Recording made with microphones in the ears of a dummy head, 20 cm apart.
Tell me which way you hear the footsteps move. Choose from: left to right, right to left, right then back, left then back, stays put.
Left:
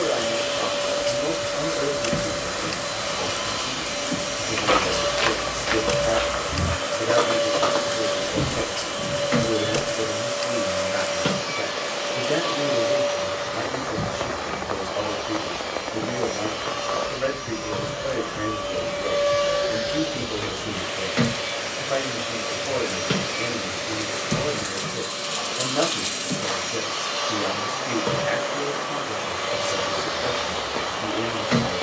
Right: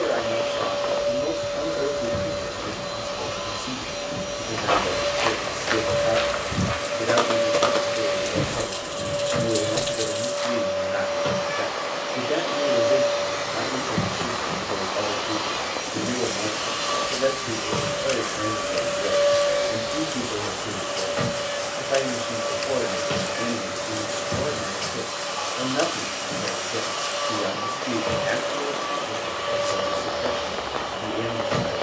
right then back.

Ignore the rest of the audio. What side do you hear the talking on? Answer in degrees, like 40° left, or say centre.
10° right.